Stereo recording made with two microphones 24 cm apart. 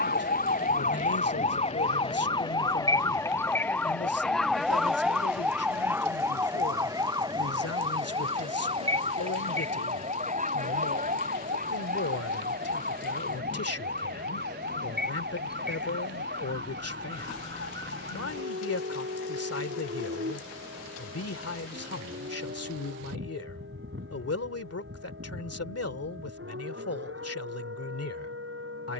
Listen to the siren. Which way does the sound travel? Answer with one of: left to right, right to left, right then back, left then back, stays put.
left to right.